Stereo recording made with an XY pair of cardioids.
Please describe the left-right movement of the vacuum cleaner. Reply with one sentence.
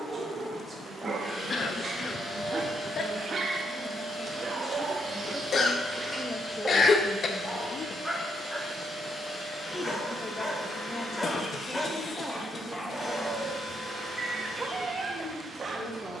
You can hear the vacuum cleaner stay put.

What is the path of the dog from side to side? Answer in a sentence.
In this clip you hear the dog go left and come back.